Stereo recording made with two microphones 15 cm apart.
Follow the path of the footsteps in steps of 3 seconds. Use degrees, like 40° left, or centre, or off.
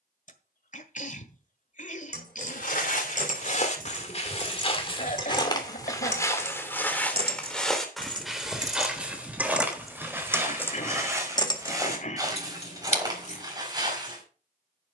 60° left, 40° left, 10° left, 20° right, 30° right.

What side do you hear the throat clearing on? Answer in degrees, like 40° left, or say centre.
50° left.